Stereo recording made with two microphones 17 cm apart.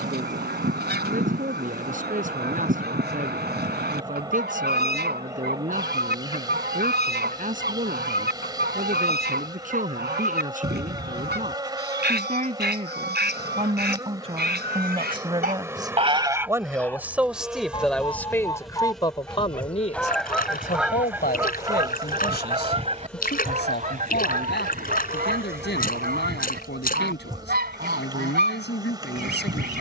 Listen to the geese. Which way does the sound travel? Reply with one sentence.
You can hear the geese move from right to left and back again.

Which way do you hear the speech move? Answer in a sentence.
In this clip you hear the speech move from right to left.